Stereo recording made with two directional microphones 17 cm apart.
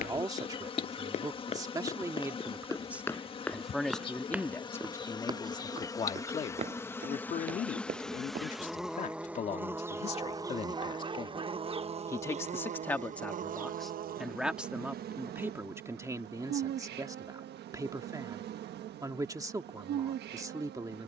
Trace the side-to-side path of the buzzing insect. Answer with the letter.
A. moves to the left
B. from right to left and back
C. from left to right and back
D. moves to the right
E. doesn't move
D.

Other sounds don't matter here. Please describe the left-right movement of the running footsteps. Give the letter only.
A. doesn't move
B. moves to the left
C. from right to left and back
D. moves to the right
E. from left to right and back
D.